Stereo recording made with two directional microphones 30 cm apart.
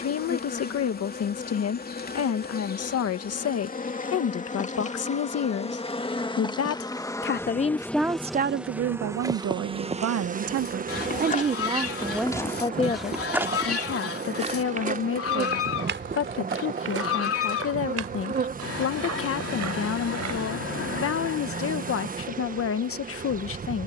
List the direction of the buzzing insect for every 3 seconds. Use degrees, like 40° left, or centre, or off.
30° left, 20° left, 10° left, 20° right, 30° right, 30° right, 30° right, 30° right.